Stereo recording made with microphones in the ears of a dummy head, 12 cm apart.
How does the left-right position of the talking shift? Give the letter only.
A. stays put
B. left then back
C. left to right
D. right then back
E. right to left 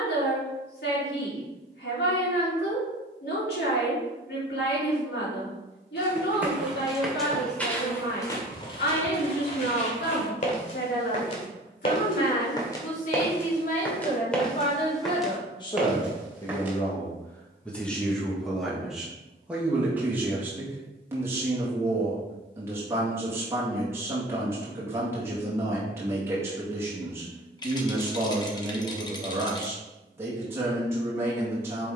C.